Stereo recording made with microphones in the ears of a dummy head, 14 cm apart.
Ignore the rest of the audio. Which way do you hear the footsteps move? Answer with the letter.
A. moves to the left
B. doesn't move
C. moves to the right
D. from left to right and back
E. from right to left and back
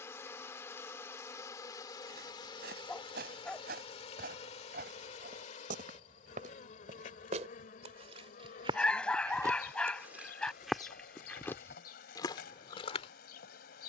A.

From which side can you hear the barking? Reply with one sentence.
In this clip you hear the barking in the centre.